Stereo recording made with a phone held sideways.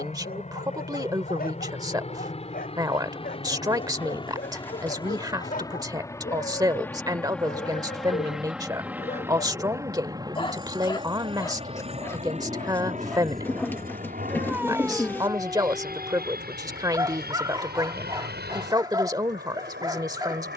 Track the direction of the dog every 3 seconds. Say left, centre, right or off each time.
left, left, left, left, centre, right, right.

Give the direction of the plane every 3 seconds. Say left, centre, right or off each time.
left, left, centre, right, right, right, right.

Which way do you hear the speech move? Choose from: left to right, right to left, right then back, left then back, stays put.
stays put.